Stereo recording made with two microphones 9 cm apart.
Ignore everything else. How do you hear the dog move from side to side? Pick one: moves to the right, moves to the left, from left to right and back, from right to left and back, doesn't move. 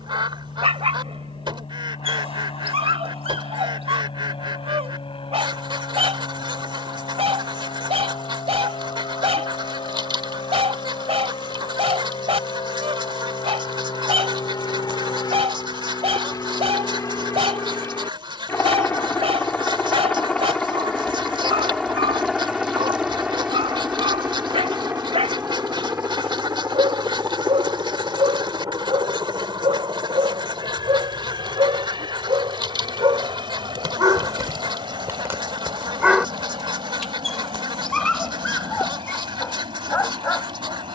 moves to the left.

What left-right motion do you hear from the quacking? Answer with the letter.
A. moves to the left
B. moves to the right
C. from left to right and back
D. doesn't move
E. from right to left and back
D.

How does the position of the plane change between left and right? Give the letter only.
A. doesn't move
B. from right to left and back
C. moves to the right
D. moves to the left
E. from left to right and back
C.